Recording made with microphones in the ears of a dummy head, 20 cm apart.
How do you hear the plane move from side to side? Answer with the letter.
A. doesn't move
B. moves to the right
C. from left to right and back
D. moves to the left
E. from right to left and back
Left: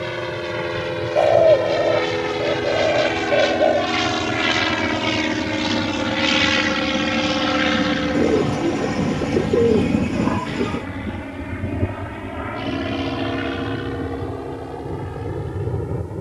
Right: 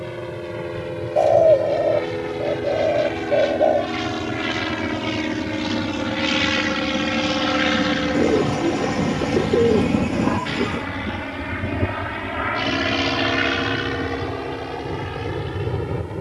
B.